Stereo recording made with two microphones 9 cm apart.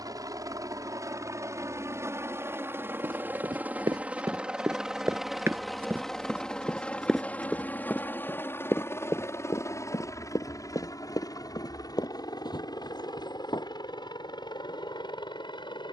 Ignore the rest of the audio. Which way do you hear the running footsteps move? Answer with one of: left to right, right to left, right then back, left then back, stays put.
right to left.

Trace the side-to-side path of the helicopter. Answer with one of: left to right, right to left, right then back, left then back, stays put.
right to left.